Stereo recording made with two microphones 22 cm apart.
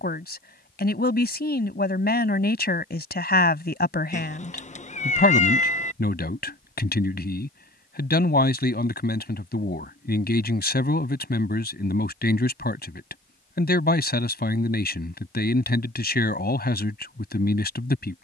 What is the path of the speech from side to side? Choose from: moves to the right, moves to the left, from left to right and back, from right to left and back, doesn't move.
doesn't move.